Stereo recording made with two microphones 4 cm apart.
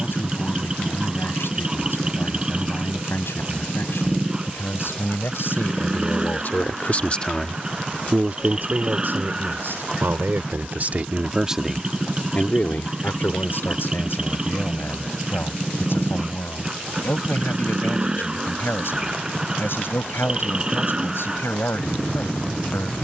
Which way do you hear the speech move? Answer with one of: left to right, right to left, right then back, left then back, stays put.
right then back.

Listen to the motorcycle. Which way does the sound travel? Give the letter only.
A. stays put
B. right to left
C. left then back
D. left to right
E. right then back
A.